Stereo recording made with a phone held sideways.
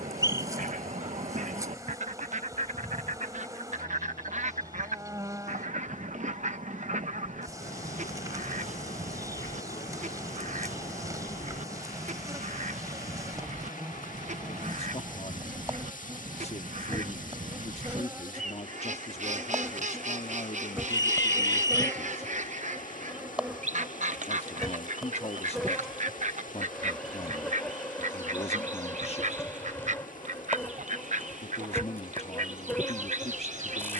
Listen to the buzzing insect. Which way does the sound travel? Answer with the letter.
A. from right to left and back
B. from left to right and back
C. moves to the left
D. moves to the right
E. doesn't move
C.